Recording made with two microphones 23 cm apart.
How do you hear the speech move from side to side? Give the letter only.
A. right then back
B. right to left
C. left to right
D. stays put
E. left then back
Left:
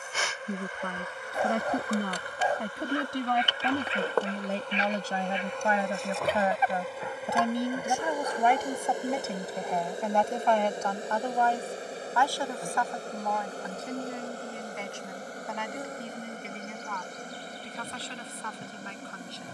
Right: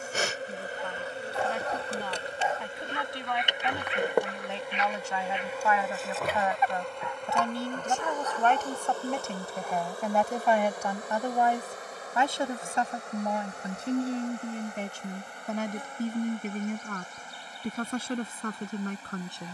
C.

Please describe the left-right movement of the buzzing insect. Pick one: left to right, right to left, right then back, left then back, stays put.
right to left.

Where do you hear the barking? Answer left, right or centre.
left.